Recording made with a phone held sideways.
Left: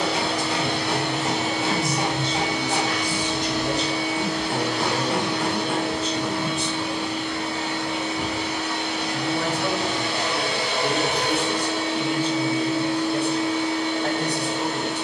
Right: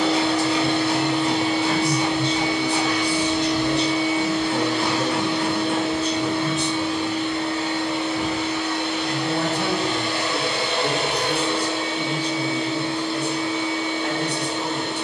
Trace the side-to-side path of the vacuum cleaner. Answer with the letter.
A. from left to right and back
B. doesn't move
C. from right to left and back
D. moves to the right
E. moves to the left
B.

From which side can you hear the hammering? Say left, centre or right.
left.